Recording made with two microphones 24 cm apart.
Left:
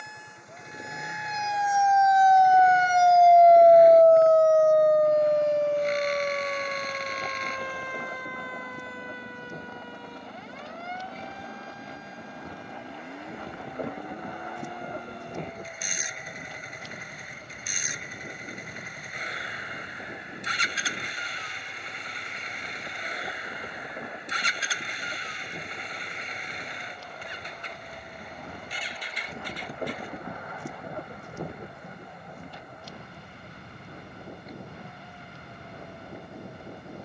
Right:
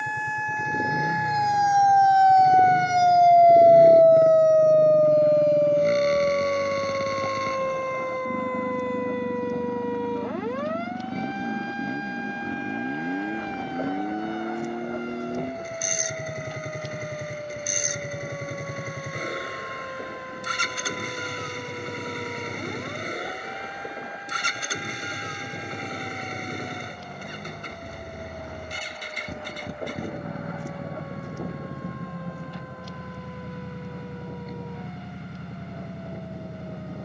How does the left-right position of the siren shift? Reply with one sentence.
You can hear the siren move from left to right.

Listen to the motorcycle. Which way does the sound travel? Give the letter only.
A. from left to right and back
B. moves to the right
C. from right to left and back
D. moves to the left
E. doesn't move
E.